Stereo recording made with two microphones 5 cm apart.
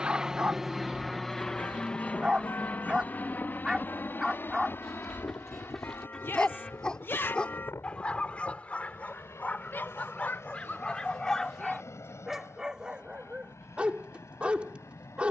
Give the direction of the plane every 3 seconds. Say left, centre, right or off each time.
centre, left, left, left, left.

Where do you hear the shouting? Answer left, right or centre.
left.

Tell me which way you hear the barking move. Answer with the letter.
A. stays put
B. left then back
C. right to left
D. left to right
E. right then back
B.